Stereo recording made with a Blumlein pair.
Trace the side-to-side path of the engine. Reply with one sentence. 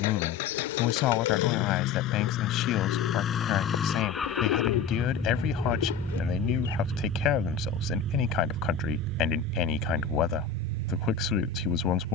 You can hear the engine travel towards the right.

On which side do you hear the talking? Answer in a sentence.
In this clip you hear the talking on the left.